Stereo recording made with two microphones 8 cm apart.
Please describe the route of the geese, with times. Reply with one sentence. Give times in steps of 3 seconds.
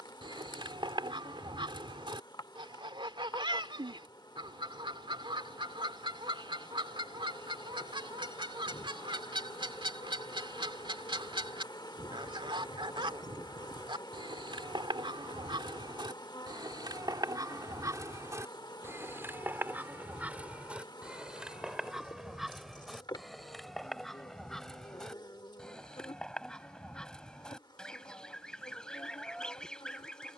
In this clip you hear the geese on the right from 0 s and in the centre from 21 s.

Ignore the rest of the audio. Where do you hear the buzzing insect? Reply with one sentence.
In this clip you hear the buzzing insect on the left.